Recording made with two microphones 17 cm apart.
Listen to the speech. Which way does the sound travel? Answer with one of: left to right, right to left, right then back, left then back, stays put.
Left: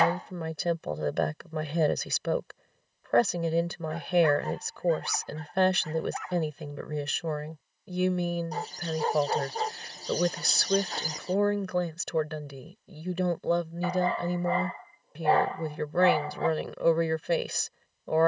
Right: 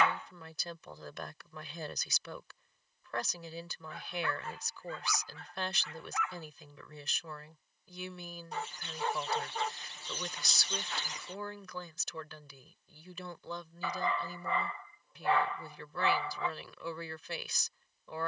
stays put.